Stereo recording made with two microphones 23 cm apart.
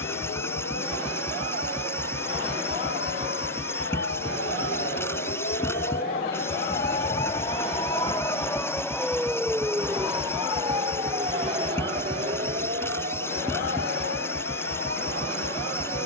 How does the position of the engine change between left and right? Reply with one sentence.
You can hear the engine stay in one place.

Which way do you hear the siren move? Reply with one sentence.
You can hear the siren move to the right.